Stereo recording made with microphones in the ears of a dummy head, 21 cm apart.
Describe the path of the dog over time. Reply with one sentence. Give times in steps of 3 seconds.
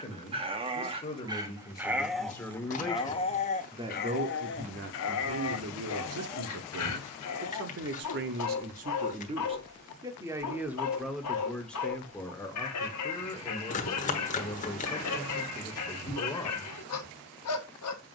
You can hear the dog in the centre from 0 s and on the left from 3 s.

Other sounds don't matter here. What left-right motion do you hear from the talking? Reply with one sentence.
In this clip you hear the talking go right and come back.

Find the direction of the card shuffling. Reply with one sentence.
You can hear the card shuffling on the left.